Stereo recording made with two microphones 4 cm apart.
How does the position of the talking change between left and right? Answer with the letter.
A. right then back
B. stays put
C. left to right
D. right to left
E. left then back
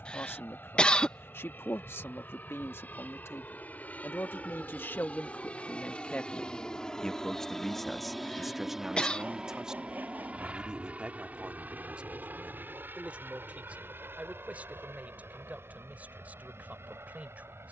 C.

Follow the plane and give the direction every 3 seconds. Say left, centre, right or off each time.
left, left, centre, right, right, right.